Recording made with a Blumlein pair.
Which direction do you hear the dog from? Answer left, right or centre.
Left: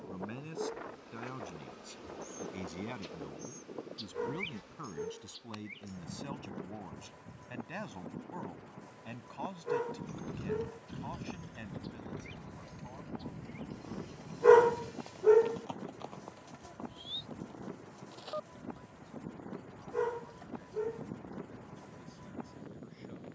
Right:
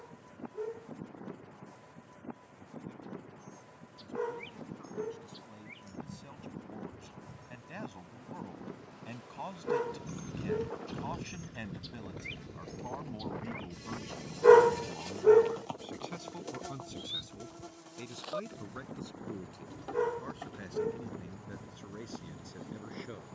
centre.